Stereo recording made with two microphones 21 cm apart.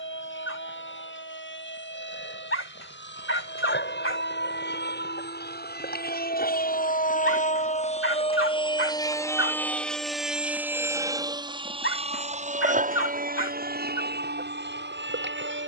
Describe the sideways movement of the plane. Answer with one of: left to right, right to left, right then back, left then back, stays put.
left to right.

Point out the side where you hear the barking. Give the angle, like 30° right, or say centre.
70° left.